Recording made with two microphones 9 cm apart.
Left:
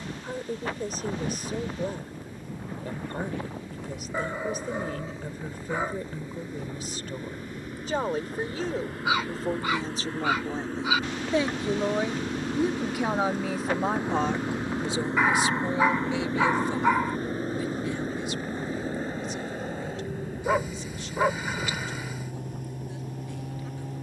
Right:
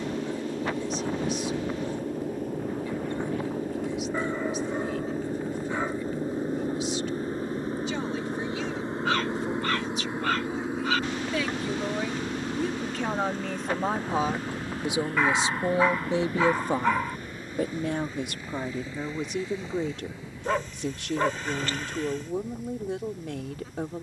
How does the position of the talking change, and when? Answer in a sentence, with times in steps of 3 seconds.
You can hear the talking on the left from 0 s, in the centre from 12 s and on the right from 15 s.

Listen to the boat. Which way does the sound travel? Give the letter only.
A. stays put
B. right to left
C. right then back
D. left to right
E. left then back
B.